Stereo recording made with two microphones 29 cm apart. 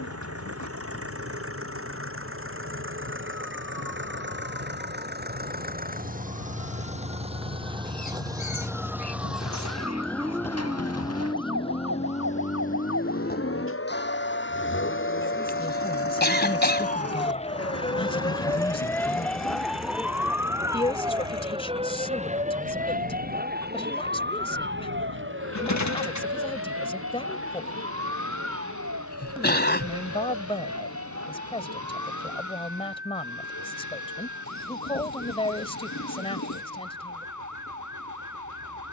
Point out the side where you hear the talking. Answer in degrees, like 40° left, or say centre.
20° left.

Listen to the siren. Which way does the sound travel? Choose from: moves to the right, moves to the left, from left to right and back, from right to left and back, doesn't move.
moves to the right.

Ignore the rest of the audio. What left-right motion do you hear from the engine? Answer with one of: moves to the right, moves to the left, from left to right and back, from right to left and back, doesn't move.
moves to the left.